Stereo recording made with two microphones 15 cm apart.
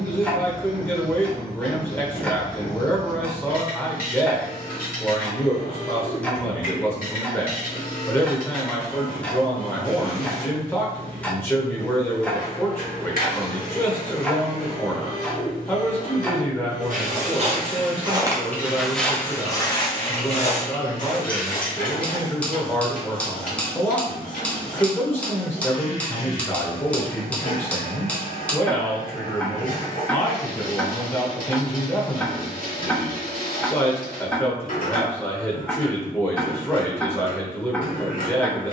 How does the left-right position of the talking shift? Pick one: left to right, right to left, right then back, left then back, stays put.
stays put.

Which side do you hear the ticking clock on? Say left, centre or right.
centre.